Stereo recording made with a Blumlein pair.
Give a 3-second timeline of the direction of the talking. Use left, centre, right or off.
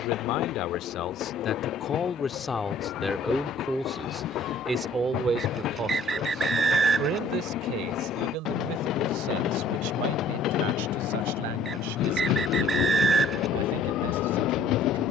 left, centre, right, right, right.